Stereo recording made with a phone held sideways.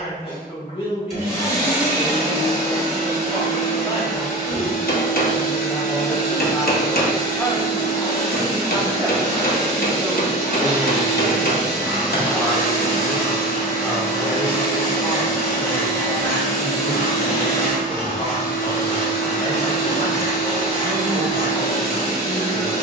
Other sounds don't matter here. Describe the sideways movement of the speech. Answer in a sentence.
In this clip you hear the speech go right and come back.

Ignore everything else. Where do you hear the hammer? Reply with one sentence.
In this clip you hear the hammer on the left.